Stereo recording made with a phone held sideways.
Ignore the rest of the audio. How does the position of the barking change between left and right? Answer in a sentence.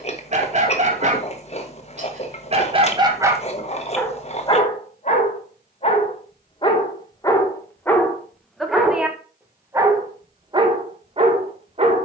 You can hear the barking go left and come back.